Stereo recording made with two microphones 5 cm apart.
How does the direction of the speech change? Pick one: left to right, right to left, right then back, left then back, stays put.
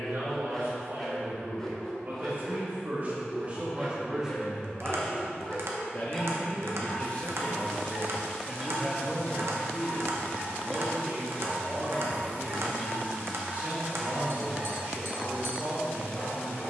left then back.